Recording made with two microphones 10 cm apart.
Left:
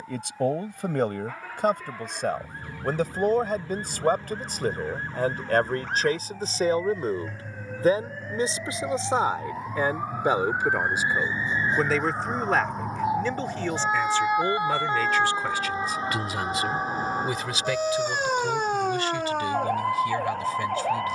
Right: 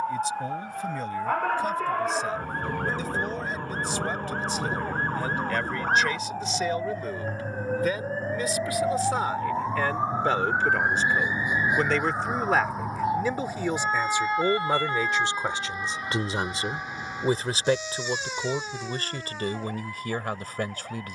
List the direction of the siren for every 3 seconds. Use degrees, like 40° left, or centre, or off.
60° right, 50° right, 40° right, 20° right, centre, 30° left, 50° left.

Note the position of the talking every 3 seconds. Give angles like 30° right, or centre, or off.
60° left, 50° left, 30° left, 10° left, 10° right, 30° right, 40° right.